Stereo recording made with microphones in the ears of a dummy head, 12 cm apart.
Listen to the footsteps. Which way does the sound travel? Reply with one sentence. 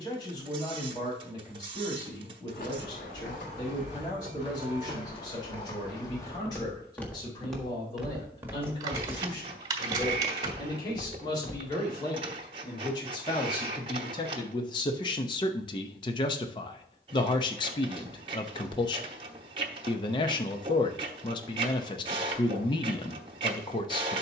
You can hear the footsteps move from left to right and back again.